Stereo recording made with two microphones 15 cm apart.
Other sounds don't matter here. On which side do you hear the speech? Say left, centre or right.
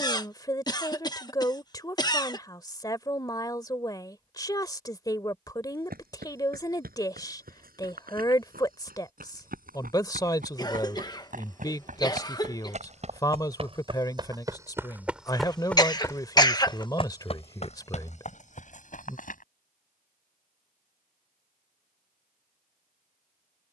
left.